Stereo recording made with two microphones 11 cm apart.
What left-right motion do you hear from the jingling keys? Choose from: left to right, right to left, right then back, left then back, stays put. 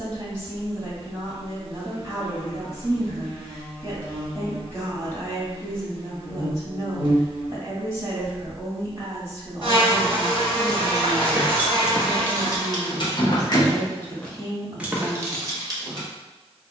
left then back.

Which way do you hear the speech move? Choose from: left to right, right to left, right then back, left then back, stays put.
stays put.